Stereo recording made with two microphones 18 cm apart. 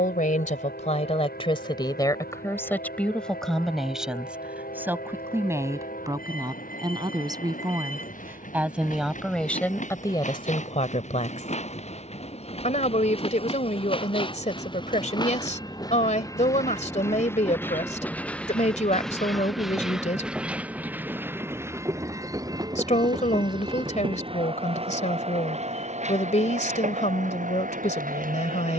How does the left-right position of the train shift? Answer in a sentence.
You can hear the train move to the right.